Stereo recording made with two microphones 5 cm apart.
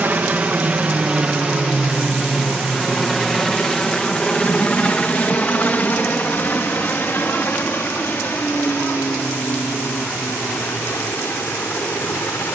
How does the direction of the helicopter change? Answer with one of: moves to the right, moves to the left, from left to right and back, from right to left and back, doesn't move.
moves to the left.